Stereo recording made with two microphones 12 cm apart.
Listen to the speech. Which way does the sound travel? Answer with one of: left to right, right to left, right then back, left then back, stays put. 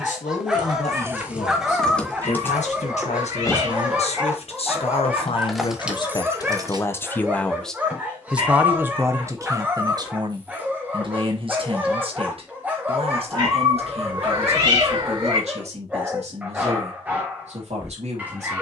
left to right.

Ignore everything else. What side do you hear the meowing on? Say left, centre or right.
right.